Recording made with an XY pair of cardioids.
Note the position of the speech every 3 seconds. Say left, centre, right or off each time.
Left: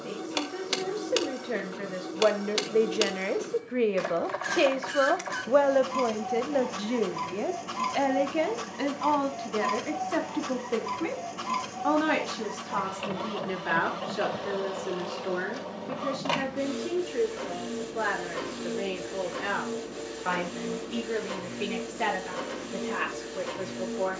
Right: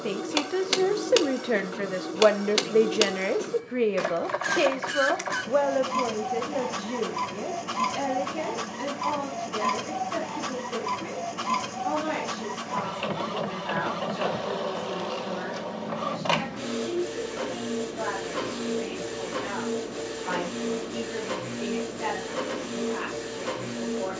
right, centre, left, left, left, left, left, left.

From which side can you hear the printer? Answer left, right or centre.
right.